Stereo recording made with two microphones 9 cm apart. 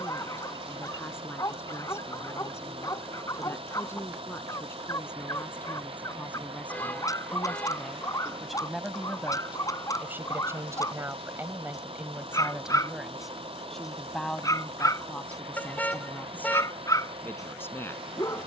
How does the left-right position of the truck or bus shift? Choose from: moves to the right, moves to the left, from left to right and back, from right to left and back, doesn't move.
doesn't move.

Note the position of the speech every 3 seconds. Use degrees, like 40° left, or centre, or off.
30° left, 20° left, 10° left, 20° right, centre, 20° left.